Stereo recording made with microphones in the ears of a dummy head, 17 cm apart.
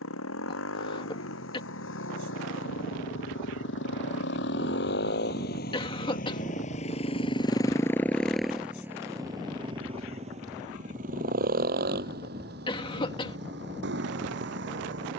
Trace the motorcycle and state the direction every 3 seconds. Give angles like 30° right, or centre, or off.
80° left, 60° left, 20° left, 40° right, 60° right.